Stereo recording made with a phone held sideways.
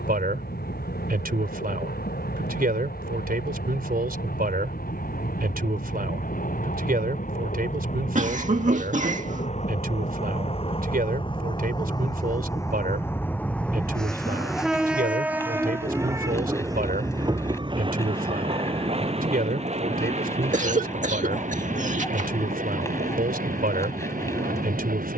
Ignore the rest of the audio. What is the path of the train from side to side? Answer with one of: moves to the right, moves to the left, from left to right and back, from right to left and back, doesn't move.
moves to the right.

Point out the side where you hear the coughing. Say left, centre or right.
right.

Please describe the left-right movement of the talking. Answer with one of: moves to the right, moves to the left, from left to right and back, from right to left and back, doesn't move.
doesn't move.